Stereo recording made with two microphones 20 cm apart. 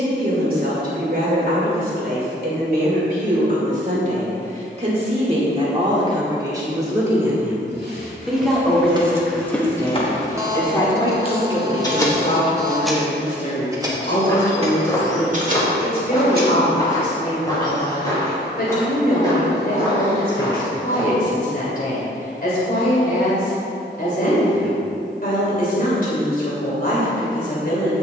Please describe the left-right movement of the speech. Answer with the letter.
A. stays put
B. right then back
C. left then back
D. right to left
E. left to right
D.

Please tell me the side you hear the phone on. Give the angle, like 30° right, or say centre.
20° right.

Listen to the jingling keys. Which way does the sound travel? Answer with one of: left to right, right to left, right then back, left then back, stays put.
left then back.